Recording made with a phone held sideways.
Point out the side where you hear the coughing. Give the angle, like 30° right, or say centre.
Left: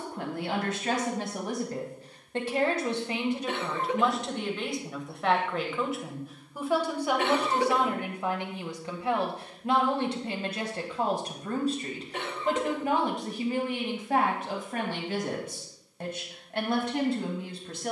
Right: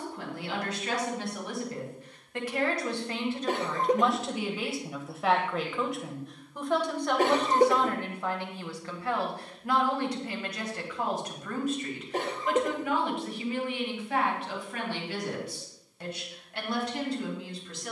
40° right.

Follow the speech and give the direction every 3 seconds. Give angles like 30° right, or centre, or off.
40° left, centre, 10° left, 30° left, 40° left, 50° left.